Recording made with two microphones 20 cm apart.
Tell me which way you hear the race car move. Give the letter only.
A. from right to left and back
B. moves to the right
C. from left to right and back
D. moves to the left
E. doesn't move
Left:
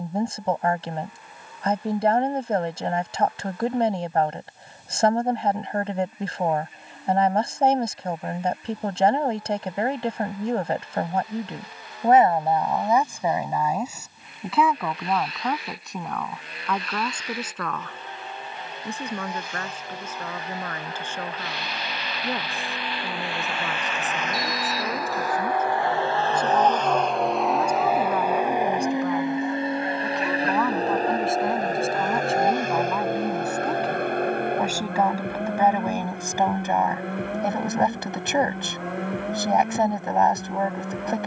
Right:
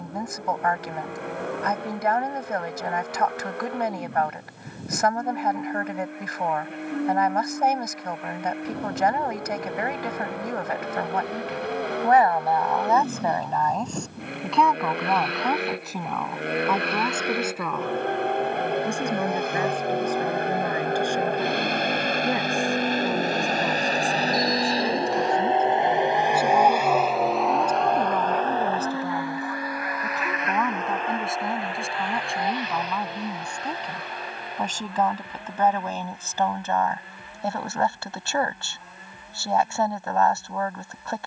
D.